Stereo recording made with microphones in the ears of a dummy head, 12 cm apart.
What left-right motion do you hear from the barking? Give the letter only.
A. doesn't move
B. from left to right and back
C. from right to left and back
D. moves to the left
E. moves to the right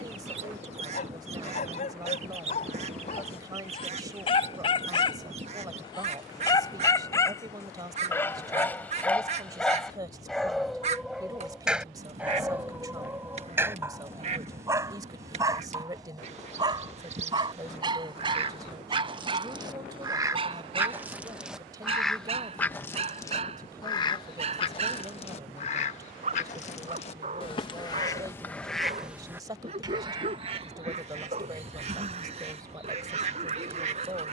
E.